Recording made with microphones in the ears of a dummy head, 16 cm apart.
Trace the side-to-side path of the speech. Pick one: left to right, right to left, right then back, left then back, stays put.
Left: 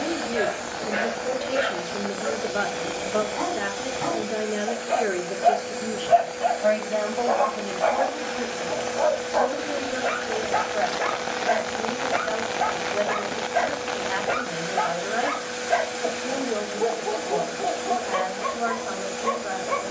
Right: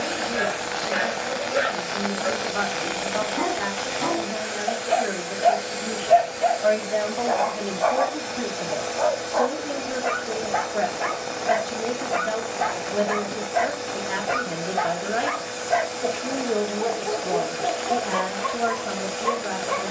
left to right.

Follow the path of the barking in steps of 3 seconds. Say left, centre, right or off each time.
right, right, centre, centre, centre, centre, centre.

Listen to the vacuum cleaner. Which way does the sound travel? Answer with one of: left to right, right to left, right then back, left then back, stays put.
stays put.